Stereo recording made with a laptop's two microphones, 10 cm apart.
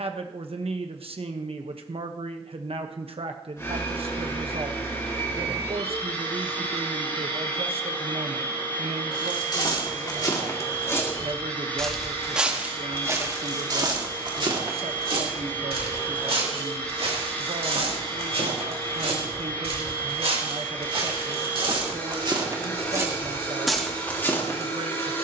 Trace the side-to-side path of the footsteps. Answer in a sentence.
In this clip you hear the footsteps move from left to right and back again.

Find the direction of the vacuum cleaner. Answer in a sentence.
In this clip you hear the vacuum cleaner on the left.